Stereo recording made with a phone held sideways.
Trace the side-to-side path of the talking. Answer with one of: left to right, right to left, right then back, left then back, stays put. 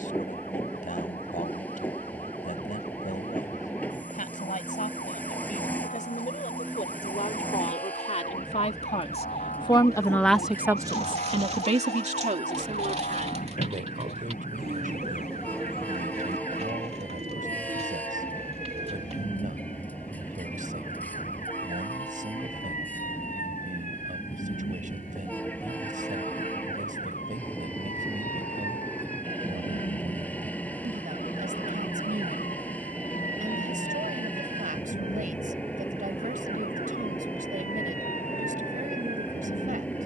left to right.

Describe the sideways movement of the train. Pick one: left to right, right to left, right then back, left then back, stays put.
stays put.